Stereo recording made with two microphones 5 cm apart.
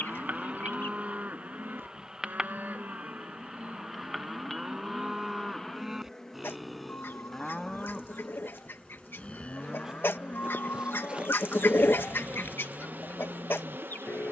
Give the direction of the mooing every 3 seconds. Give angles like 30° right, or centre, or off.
30° right, 20° right, 10° left, 30° left, 50° left.